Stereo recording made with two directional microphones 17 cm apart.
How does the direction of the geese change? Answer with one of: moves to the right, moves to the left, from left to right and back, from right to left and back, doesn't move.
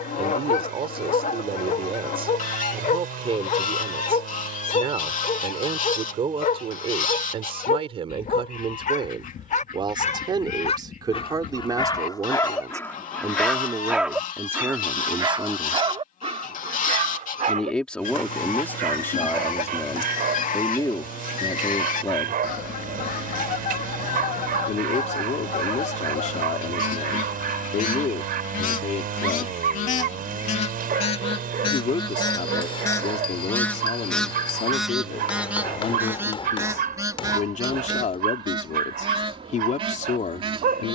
moves to the right.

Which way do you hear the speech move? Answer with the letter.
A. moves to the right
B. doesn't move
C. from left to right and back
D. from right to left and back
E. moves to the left
E.